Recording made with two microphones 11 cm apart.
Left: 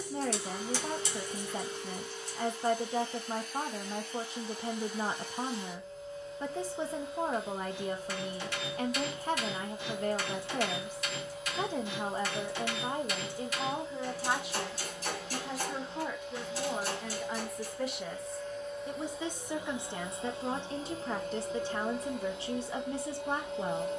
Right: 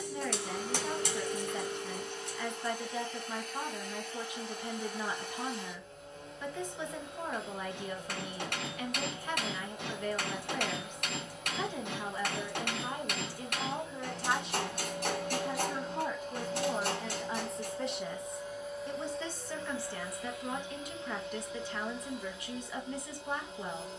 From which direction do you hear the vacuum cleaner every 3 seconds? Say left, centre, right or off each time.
right, right, right, right, right, right, centre, left.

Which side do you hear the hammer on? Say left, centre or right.
right.